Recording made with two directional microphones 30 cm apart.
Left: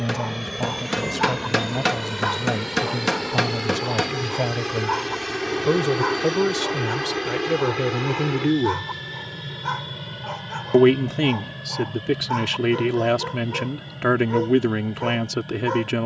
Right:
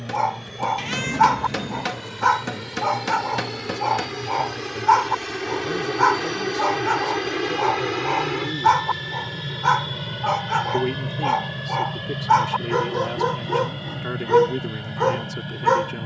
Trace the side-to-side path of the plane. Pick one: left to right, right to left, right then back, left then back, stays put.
left to right.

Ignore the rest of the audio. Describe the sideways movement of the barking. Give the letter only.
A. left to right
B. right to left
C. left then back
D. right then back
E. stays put
E.